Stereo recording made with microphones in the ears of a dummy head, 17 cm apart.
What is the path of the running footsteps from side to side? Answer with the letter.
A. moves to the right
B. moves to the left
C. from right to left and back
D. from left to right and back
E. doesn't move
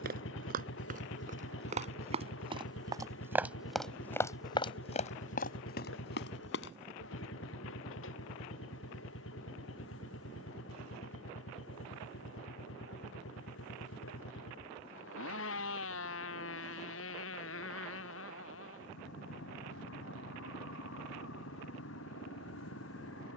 B.